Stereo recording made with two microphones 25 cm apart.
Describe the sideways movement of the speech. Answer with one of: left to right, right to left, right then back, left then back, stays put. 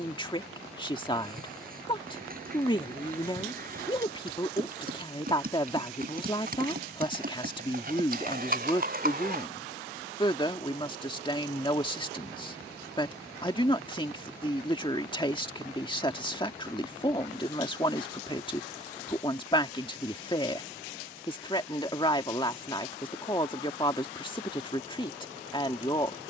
stays put.